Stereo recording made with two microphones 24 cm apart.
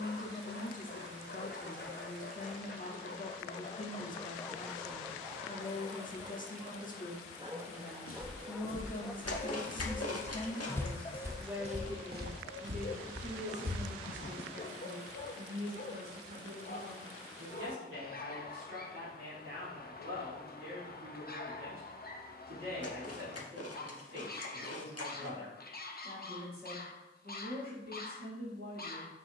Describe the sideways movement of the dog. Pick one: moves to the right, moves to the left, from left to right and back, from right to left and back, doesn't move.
from left to right and back.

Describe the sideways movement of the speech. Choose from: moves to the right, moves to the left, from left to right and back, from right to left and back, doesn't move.
moves to the right.